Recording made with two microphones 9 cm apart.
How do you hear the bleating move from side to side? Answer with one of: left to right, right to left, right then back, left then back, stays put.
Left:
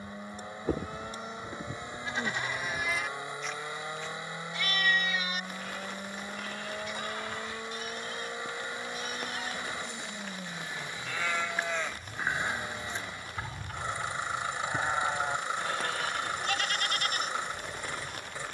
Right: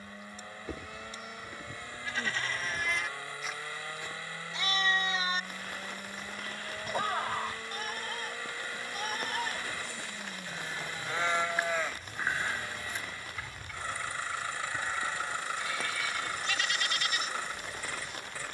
right then back.